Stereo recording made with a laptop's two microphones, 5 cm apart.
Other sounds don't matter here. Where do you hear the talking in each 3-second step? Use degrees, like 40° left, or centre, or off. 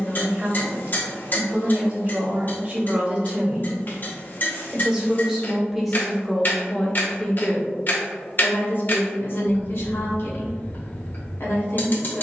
40° right, 20° right, 20° left, 70° left.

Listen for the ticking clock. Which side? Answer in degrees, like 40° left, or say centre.
50° left.